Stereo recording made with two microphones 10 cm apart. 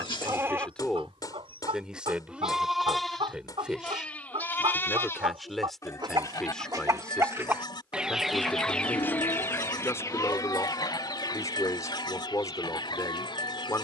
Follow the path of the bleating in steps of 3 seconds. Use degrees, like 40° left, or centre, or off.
20° right, 20° left, 50° left, 50° left, 50° left.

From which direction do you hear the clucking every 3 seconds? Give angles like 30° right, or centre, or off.
80° right, 70° right, 20° right, 40° left, 60° left.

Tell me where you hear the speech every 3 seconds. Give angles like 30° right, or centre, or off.
centre, centre, 10° left, 30° left, 30° left.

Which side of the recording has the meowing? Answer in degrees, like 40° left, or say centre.
60° left.